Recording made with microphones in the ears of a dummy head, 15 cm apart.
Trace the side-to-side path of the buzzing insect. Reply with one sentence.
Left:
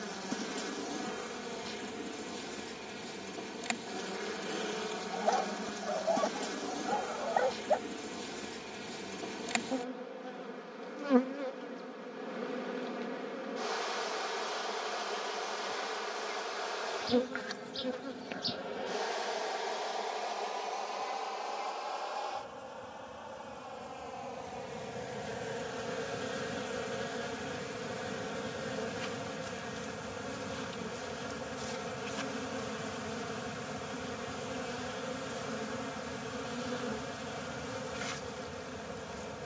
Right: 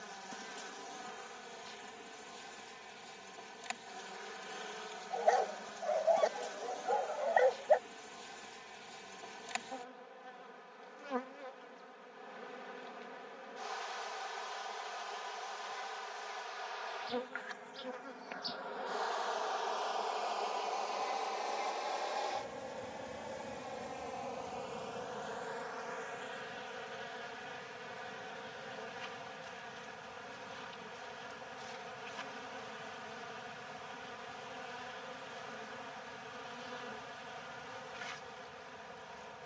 You can hear the buzzing insect move from left to right and back again.